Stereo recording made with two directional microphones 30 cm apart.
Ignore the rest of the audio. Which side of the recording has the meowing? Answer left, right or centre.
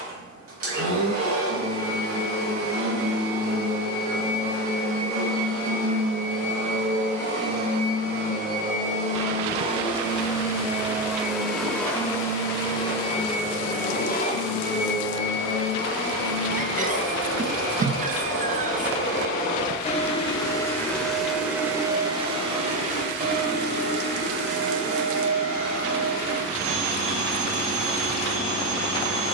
right.